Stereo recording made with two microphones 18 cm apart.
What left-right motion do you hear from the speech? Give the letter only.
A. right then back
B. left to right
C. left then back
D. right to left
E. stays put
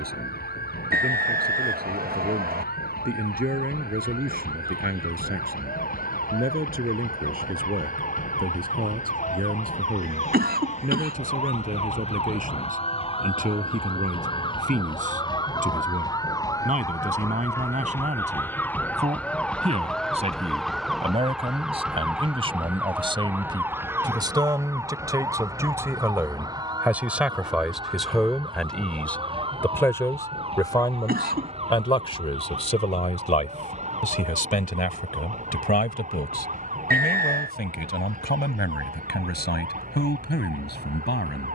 D.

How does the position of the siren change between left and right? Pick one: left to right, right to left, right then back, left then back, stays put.
left to right.